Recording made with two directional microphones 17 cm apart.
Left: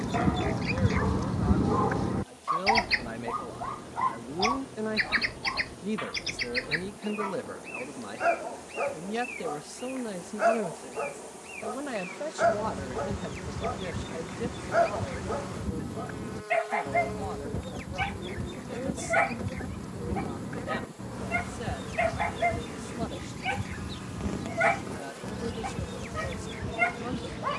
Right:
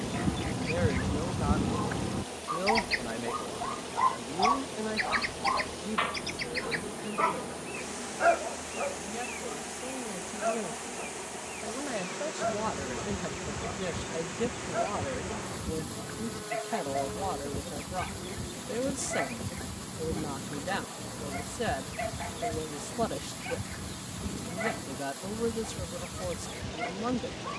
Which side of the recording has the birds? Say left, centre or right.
left.